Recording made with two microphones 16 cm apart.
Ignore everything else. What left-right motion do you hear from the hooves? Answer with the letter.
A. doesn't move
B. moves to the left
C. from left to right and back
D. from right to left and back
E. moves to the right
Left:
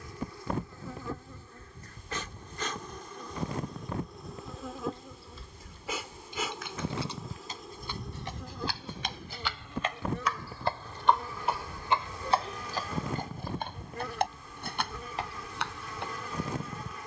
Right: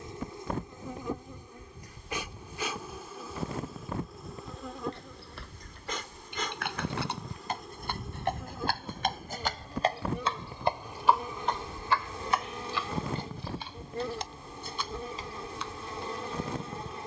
B.